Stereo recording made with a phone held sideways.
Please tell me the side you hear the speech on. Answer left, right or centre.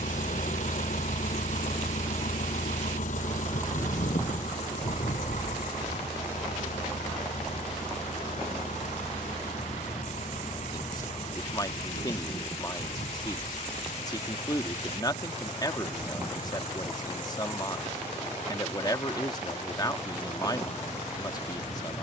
left.